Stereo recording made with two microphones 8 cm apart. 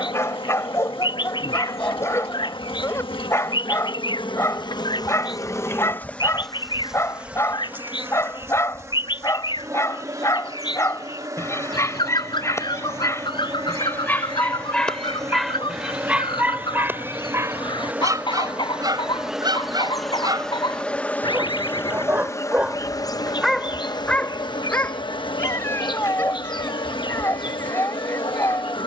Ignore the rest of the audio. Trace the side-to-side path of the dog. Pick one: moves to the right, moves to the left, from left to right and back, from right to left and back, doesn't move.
from left to right and back.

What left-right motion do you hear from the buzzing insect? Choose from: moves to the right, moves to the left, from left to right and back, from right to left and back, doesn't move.
from left to right and back.